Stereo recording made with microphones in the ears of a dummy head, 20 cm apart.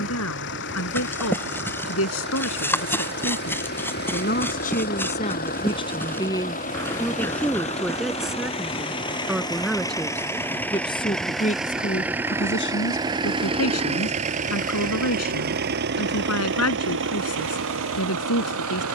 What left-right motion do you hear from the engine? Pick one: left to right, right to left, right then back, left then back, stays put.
left to right.